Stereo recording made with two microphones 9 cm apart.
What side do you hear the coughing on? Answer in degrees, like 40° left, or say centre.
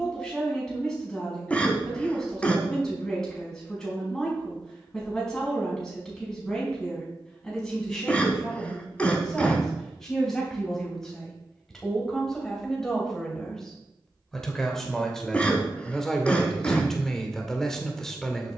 10° left.